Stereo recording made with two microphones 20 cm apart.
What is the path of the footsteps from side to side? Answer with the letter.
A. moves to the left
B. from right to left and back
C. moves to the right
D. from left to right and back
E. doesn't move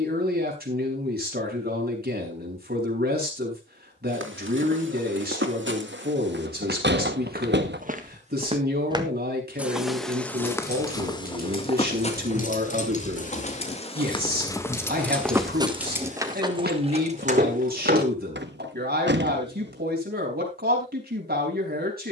B.